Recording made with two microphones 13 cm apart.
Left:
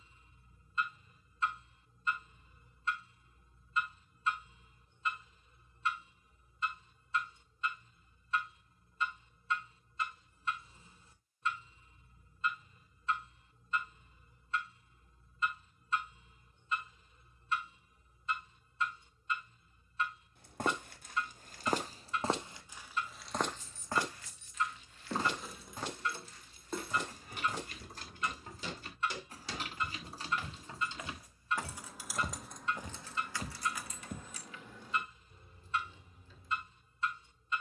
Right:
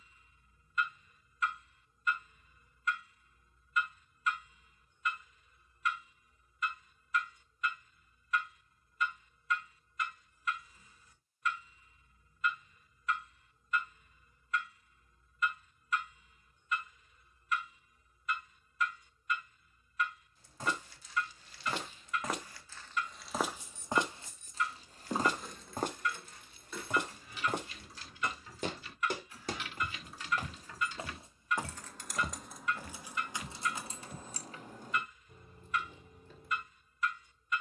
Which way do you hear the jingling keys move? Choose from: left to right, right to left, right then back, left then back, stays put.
left then back.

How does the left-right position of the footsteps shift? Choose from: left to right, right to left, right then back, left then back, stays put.
right then back.